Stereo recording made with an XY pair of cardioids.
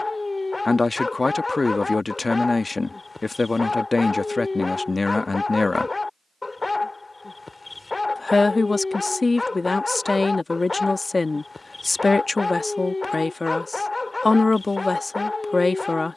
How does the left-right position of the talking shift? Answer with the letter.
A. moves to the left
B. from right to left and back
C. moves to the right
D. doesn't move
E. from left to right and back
D.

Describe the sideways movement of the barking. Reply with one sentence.
In this clip you hear the barking stay put.